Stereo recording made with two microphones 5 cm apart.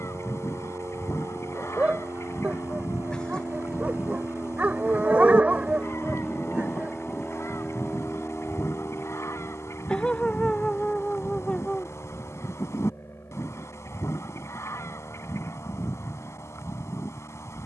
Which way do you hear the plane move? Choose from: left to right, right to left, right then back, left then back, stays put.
right to left.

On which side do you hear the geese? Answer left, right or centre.
left.